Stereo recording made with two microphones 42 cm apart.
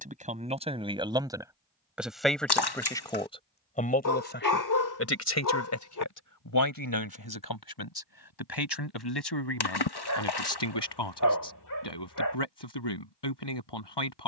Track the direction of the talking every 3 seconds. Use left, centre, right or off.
centre, left, left, left, left.